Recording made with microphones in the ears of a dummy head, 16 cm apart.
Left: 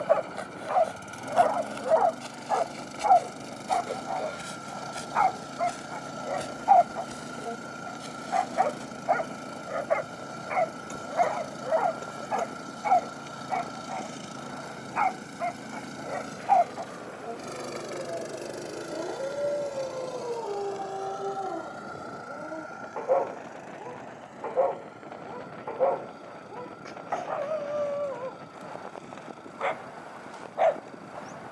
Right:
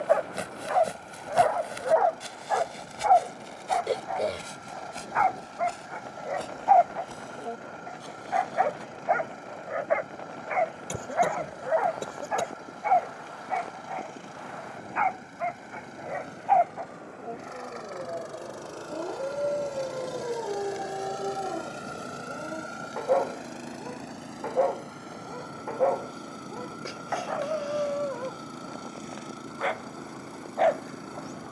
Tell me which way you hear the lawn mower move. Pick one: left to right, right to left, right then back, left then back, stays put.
left to right.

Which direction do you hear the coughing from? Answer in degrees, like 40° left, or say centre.
50° right.